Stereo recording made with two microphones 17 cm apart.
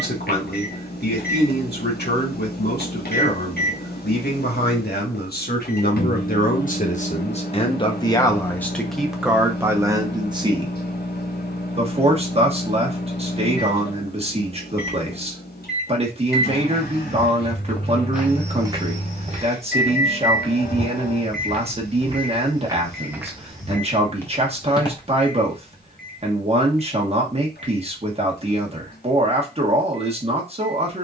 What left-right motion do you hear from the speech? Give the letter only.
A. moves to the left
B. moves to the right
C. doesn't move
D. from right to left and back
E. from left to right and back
B.